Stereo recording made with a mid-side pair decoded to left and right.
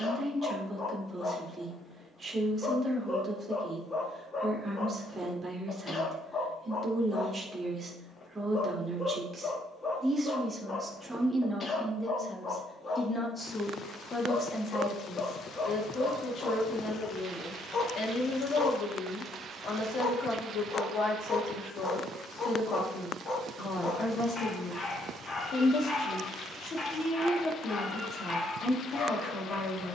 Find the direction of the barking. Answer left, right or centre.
left.